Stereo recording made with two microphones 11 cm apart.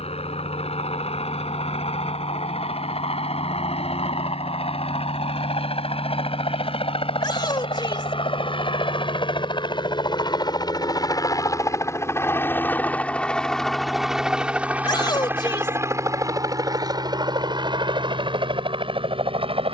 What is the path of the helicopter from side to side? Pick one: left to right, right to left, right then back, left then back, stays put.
left to right.